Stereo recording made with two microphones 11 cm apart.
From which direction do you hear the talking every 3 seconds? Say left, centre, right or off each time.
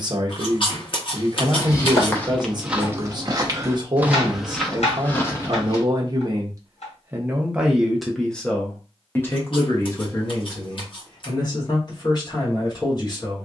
right, right, centre, left, left.